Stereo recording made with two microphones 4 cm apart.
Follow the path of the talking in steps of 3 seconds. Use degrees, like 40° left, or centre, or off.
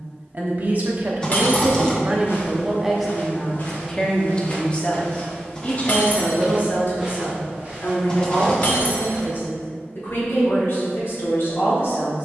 30° right, 20° left, 50° left, 60° left.